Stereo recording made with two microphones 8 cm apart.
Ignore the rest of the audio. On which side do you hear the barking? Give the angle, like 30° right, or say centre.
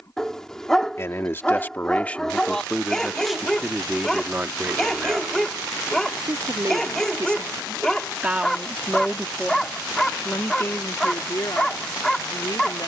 10° left.